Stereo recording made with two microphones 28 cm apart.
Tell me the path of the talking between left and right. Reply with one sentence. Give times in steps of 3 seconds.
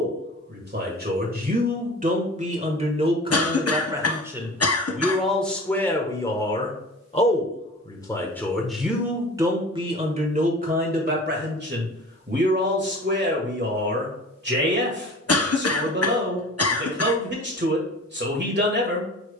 You can hear the talking on the right from 0 s, in the centre from 3 s and on the right from 9 s.